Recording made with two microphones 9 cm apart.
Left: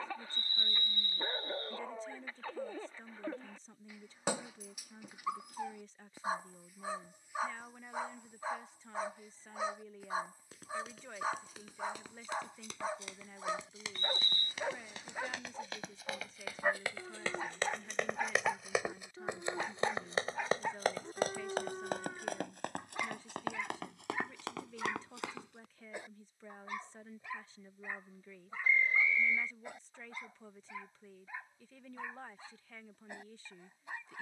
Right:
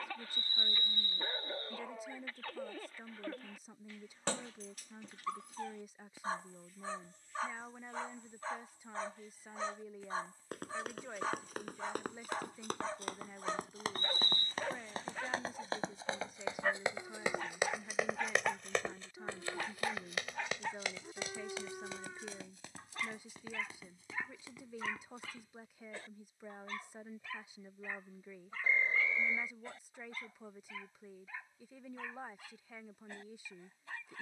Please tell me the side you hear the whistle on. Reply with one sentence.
You can hear the whistle on the right.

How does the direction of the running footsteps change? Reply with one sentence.
In this clip you hear the running footsteps move from right to left.